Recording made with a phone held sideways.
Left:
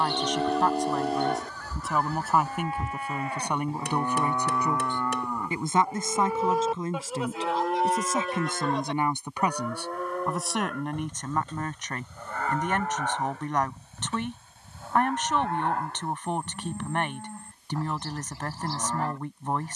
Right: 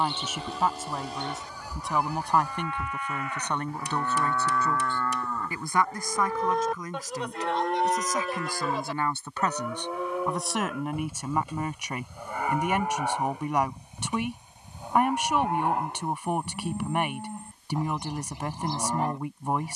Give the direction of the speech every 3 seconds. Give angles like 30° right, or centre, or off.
centre, 20° left, 20° left, centre, 10° right, 10° right, 10° right.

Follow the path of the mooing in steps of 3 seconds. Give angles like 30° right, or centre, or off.
50° left, 20° left, centre, 10° right, 10° right, 20° right, 20° right.